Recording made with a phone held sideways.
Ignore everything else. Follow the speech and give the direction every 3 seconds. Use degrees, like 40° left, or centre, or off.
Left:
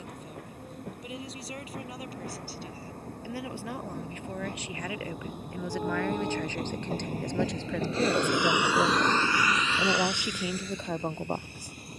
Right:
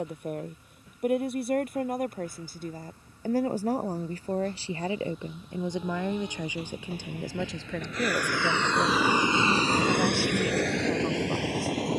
50° right, 30° right, centre, 20° left.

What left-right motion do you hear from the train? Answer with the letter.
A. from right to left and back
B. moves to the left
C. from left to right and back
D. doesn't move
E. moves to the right
E.